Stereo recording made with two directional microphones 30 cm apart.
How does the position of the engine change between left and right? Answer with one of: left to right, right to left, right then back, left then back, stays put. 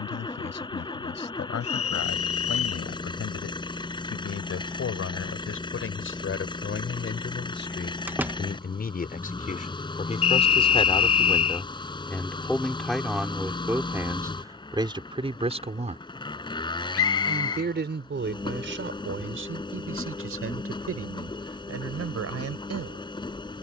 stays put.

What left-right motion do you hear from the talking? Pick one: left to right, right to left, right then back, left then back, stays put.
left to right.